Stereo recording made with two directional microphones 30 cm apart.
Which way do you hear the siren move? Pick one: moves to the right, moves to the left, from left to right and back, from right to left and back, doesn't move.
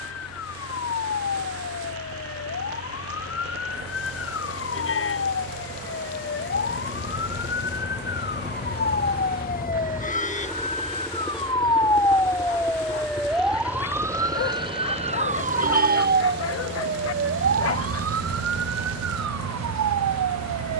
moves to the right.